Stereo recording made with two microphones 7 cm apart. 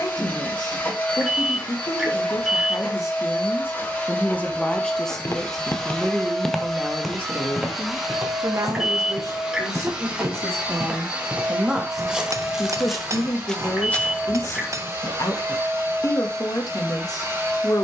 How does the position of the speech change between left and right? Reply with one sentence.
You can hear the speech move from left to right and back again.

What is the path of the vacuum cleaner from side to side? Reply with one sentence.
You can hear the vacuum cleaner move from left to right.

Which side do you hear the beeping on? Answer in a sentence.
You can hear the beeping in the centre.